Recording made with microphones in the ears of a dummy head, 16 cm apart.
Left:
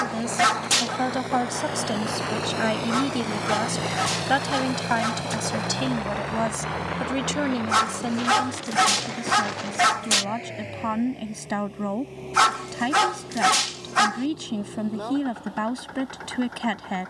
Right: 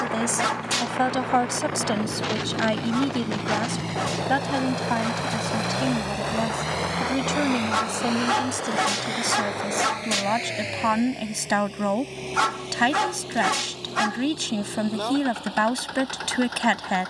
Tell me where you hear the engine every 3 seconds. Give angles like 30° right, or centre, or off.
60° left, 20° left, 50° right, 70° right, 80° right, 80° right.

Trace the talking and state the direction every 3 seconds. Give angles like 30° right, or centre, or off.
10° right, 30° left, 10° left, 30° right, 30° right, 30° right.